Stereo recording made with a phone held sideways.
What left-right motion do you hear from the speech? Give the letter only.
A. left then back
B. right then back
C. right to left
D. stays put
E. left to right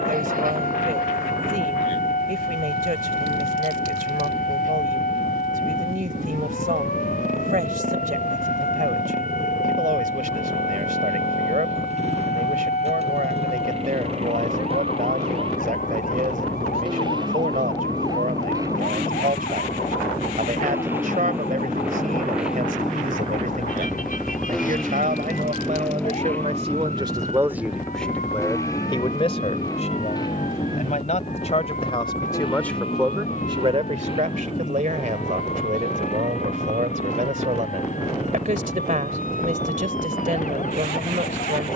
A.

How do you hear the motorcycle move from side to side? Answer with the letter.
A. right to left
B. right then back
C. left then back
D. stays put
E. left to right
A.